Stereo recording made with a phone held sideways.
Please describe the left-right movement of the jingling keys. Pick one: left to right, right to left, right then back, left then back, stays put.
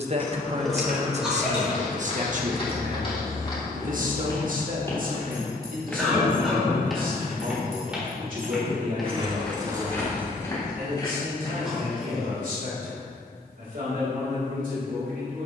right then back.